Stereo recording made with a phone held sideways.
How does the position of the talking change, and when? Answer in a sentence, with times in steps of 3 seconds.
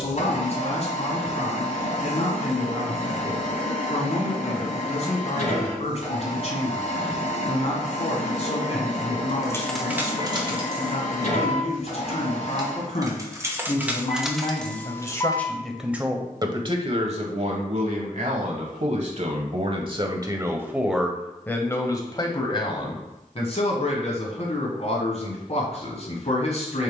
In this clip you hear the talking on the left from 0 s, on the right from 15 s and on the left from 21 s.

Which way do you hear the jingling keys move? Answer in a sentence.
You can hear the jingling keys move from left to right and back again.